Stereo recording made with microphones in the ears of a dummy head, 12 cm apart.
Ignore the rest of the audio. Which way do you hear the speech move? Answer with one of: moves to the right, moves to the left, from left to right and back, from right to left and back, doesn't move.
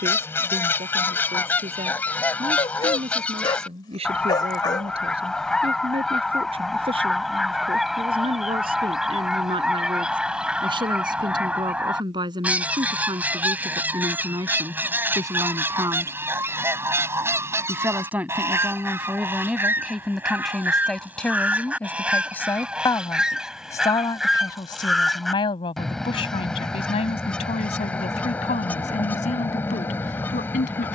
moves to the left.